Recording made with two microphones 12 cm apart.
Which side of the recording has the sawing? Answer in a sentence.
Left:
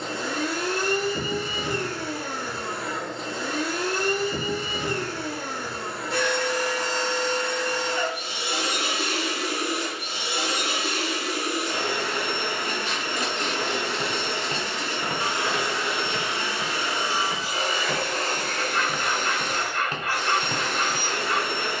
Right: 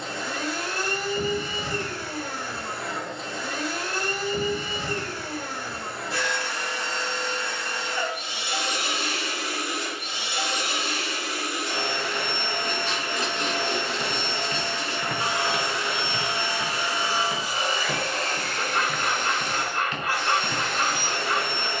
In this clip you hear the sawing on the right.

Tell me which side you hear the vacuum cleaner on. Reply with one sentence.
In this clip you hear the vacuum cleaner on the left.